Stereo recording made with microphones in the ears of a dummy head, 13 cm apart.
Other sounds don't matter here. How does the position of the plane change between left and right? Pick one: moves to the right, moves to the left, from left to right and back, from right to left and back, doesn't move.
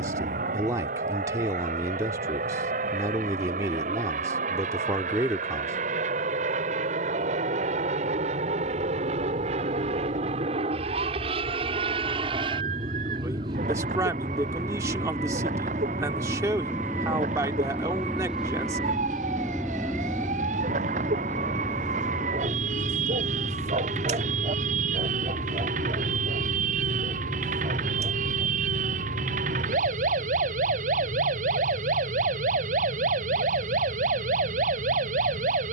moves to the left.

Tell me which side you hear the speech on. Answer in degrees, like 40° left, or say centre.
20° right.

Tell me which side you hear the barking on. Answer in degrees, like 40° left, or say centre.
50° right.